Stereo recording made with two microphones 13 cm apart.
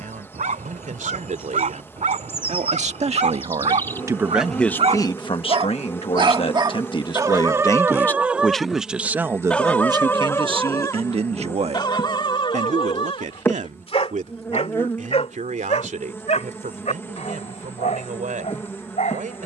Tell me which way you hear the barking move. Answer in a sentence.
You can hear the barking travel towards the left.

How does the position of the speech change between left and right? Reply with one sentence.
You can hear the speech move from right to left and back again.